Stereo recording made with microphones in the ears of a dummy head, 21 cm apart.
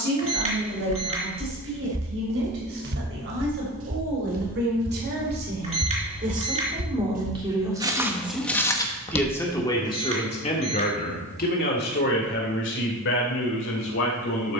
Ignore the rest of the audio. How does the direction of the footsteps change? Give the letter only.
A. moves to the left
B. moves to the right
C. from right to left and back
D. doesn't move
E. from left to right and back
E.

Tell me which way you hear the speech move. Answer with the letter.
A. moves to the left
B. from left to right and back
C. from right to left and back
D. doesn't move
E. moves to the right
A.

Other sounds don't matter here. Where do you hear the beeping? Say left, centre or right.
right.